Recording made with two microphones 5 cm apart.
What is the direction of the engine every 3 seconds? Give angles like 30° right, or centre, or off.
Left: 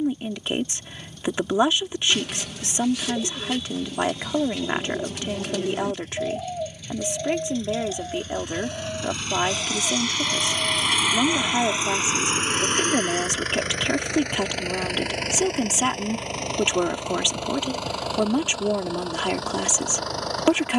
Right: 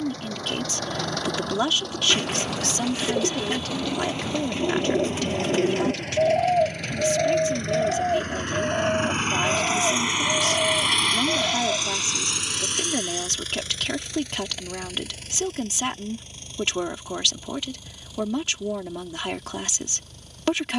80° right, 70° right, 60° right, 10° right, 50° left, 70° left, 70° left.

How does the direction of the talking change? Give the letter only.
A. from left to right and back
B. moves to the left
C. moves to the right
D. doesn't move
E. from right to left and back
D.